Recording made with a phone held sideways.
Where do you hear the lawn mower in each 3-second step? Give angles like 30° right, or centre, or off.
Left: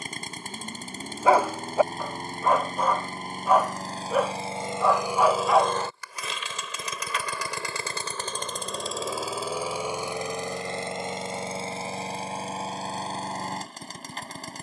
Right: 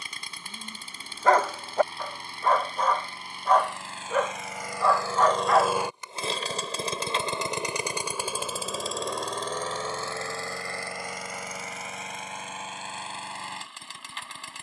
40° left, 20° left, 20° right, 20° left, 40° left.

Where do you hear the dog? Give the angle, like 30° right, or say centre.
10° left.